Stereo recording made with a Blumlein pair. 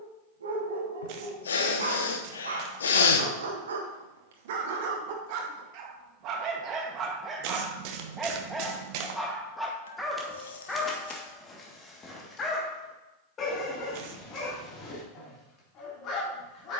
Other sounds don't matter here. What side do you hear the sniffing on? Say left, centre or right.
left.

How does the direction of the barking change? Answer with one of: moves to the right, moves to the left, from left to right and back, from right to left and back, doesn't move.
moves to the left.